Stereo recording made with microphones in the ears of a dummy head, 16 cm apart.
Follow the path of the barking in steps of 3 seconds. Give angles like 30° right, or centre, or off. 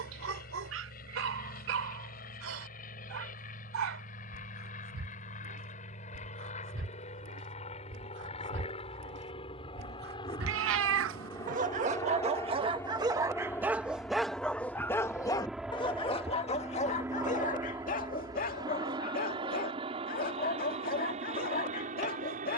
80° right, 80° right, 70° right, 50° right, 10° right, 30° left, 50° left, 50° left.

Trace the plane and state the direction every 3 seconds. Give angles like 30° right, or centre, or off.
50° left, 40° left, 40° left, 20° left, 10° left, 10° right, 30° right, 40° right.